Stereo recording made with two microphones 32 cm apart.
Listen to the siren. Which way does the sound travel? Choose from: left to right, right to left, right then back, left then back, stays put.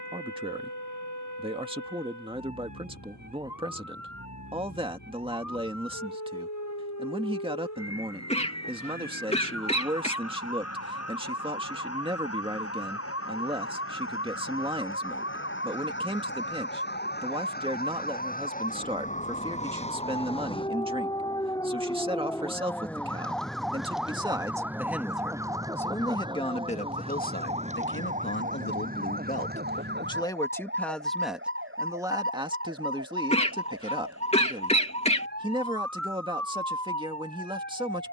left to right.